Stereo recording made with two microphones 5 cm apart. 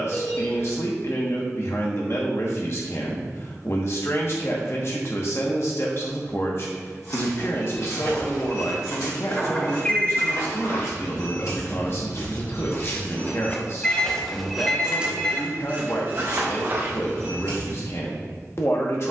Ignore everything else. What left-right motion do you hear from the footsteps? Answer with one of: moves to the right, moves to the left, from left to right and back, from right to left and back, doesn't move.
moves to the right.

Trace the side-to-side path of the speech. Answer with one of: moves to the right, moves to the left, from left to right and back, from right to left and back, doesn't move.
doesn't move.